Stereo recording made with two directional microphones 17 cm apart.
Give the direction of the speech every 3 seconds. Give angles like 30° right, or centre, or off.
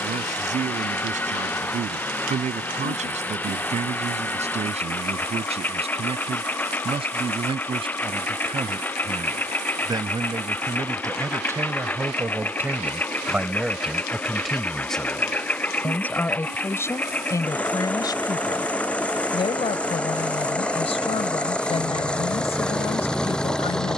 40° right, 40° right, 30° right, 20° right, 10° right, 10° left, 30° left, 40° left.